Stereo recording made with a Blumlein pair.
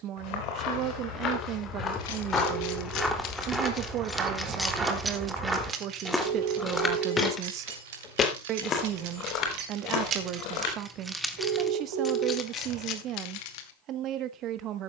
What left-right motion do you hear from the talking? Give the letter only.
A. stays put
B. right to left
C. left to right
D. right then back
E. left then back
A.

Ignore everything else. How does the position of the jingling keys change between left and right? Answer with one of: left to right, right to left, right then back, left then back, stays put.
right then back.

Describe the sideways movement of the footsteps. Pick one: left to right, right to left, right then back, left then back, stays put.
right then back.